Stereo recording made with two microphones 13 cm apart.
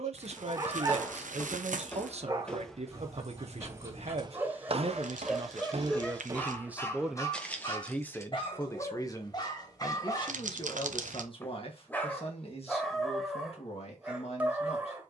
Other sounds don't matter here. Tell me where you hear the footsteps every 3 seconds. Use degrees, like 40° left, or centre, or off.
10° left, 40° right, centre, off, off.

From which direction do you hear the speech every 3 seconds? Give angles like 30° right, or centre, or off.
60° right, 50° right, centre, 40° left, 50° left.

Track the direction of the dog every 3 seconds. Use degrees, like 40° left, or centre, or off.
30° right, 10° right, 30° left, 30° left, centre.